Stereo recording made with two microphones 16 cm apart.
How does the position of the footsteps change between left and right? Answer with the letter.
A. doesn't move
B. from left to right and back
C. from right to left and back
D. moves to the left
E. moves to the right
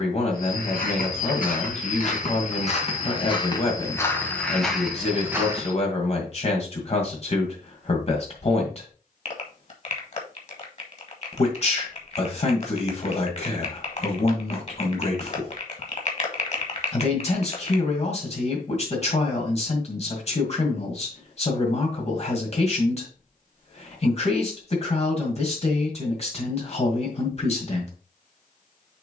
E.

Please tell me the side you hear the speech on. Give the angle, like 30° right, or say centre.
50° left.